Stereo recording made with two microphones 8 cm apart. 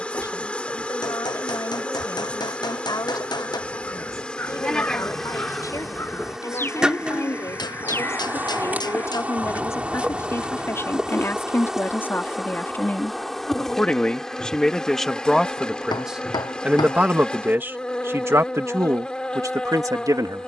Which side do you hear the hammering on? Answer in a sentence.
In this clip you hear the hammering on the left.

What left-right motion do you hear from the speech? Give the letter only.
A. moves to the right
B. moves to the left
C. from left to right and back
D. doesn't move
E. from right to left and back
A.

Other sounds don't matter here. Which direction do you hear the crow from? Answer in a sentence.
In this clip you hear the crow on the left.